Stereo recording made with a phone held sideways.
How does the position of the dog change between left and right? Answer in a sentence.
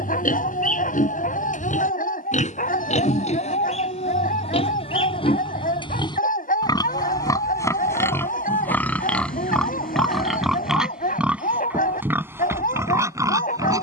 You can hear the dog stay put.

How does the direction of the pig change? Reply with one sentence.
You can hear the pig move to the right.